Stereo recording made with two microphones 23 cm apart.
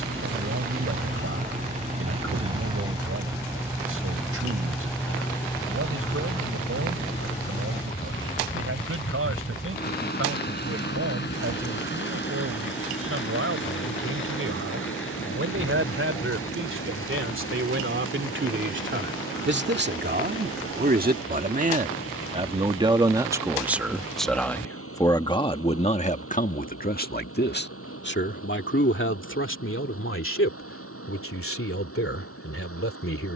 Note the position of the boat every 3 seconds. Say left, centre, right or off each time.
right, centre, left, left, left, left, left, left, left, left, left.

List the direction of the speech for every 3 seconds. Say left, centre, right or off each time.
right, right, right, right, right, right, right, right, left, left, left.